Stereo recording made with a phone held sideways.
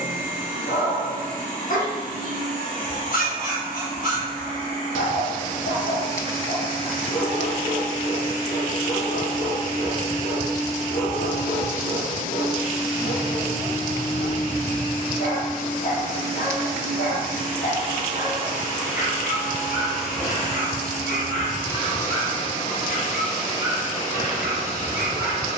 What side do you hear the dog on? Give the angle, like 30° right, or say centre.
70° left.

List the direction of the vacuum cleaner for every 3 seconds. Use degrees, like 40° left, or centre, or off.
60° right, 60° right, 60° right, 60° right, 60° right, 50° right, 10° right, 30° left, 40° left.